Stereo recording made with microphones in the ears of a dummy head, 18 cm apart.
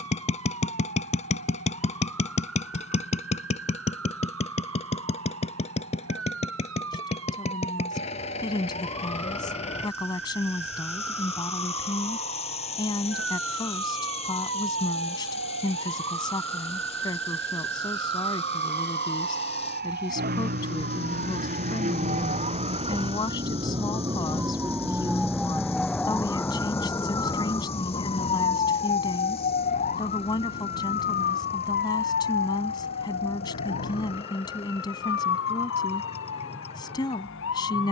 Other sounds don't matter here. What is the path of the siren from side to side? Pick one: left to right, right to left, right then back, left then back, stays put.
right to left.